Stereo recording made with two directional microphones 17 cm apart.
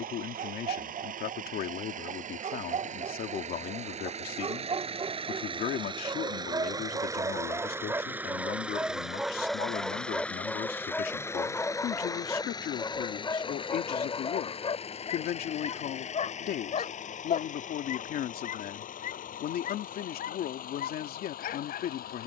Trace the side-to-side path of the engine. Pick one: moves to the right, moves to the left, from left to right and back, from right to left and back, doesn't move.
moves to the left.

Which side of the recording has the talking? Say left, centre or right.
left.